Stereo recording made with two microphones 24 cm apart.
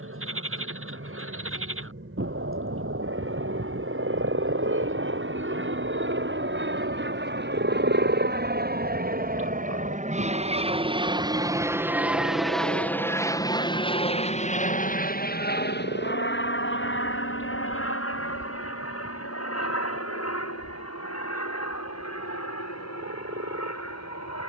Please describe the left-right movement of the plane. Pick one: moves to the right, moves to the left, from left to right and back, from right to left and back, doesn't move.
moves to the left.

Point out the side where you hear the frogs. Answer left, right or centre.
right.